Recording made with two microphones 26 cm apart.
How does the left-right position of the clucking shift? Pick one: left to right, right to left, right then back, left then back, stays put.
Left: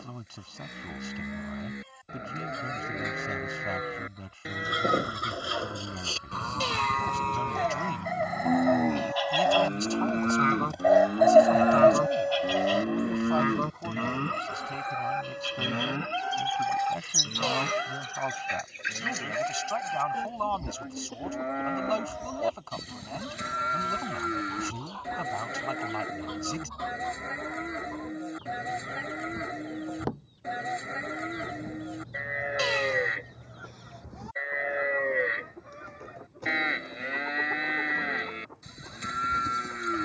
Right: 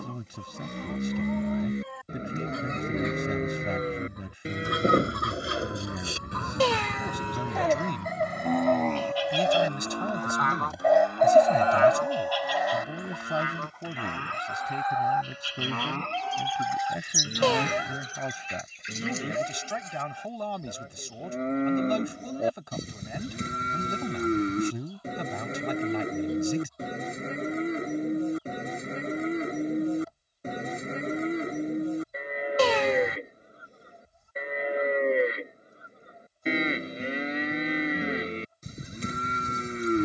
right to left.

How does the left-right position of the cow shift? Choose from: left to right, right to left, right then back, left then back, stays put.
left then back.